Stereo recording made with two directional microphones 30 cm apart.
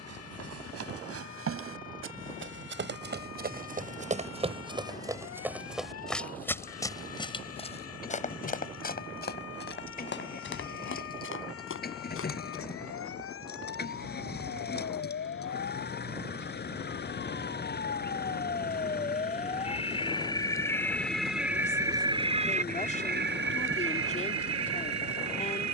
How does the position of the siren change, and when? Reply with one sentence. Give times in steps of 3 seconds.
In this clip you hear the siren on the left from 0 s and on the right from 21 s.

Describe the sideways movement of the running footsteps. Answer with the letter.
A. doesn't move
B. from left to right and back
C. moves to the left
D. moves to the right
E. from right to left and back
C.